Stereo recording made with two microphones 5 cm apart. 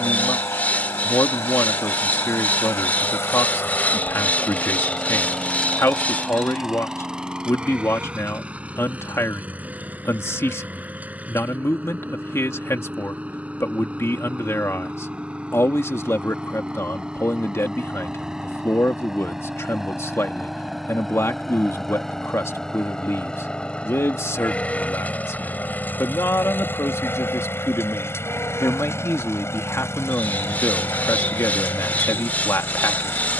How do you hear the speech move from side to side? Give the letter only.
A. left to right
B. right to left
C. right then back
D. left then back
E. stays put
E.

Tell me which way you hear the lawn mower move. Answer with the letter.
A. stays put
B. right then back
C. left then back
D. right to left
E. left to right
B.